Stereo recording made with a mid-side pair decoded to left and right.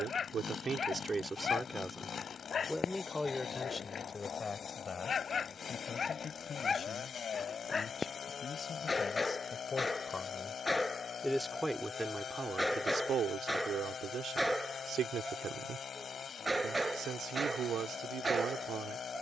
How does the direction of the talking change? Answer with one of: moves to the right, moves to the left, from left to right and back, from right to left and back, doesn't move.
from right to left and back.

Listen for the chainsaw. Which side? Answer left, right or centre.
left.